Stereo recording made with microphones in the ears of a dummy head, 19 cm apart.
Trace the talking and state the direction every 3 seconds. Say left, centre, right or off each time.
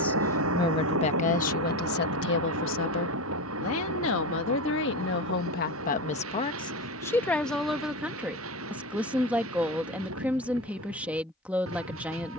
left, left, centre, centre.